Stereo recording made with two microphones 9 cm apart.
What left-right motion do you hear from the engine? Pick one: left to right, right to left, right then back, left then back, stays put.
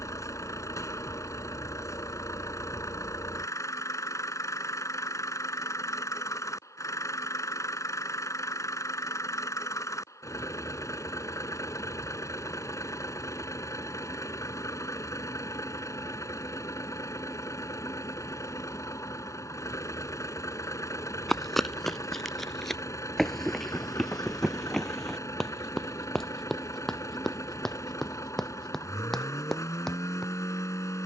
stays put.